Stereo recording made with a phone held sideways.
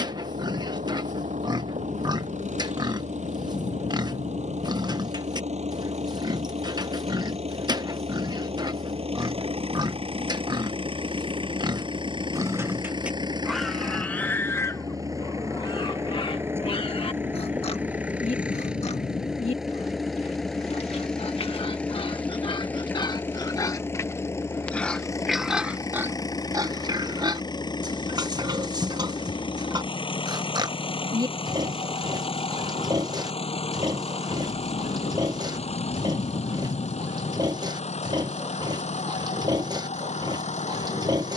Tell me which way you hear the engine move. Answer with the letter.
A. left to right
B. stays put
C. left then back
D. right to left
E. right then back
D.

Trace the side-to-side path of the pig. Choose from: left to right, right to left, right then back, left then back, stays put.
left then back.